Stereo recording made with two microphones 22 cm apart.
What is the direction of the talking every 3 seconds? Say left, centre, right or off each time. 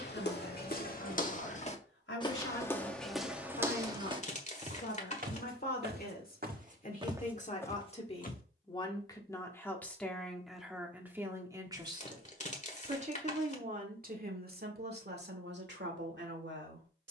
left, left, left, centre, right, right.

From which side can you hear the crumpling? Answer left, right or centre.
left.